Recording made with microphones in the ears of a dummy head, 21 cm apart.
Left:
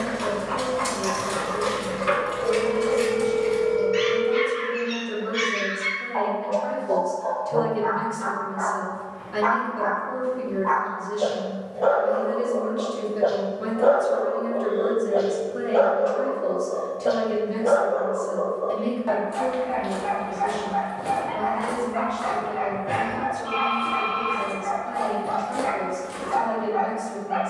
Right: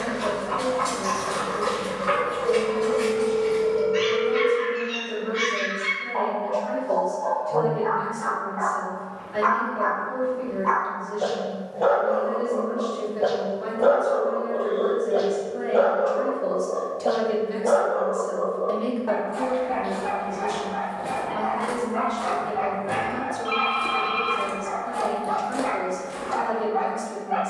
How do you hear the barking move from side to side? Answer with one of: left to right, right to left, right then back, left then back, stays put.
right then back.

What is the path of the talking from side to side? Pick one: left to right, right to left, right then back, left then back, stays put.
left to right.